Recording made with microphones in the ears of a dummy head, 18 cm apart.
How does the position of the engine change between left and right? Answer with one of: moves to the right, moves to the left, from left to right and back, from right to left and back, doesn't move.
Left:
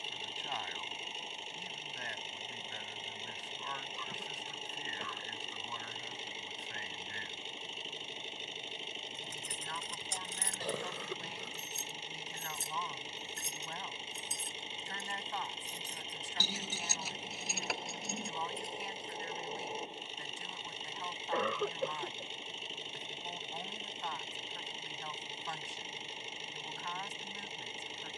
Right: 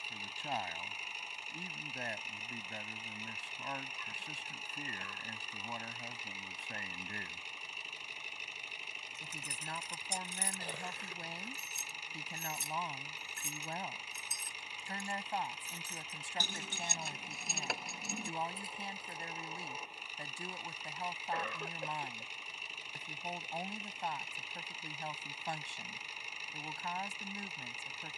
doesn't move.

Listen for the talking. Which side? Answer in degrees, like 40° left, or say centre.
30° right.